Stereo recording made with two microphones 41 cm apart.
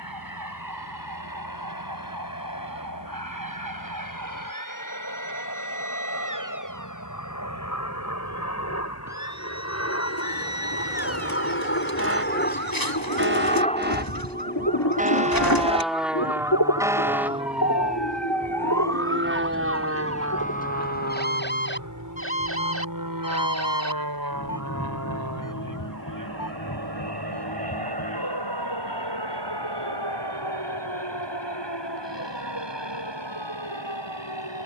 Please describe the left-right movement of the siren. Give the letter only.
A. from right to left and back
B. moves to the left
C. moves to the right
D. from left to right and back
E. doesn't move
B.